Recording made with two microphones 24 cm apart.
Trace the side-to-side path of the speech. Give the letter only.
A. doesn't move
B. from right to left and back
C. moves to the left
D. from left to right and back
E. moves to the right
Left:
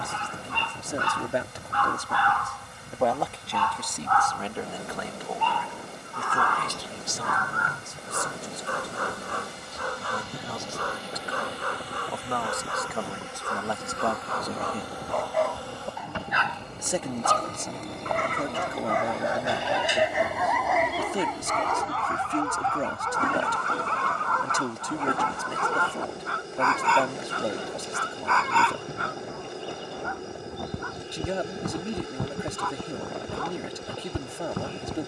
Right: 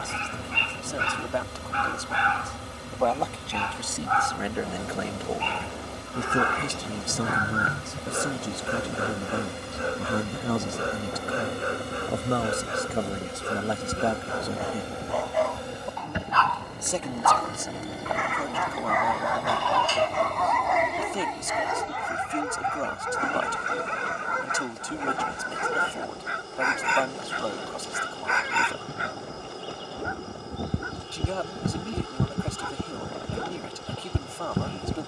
D.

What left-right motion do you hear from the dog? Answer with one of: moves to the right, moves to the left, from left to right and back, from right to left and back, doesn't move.
from right to left and back.